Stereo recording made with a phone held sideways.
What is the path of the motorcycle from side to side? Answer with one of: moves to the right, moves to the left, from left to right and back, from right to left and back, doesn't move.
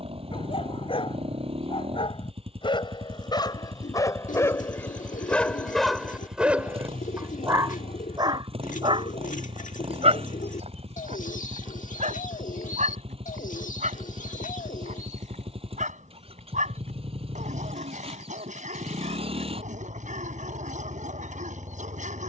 doesn't move.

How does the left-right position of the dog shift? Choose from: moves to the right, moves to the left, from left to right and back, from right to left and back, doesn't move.
moves to the right.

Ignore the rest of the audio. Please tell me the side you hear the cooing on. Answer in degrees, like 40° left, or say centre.
70° left.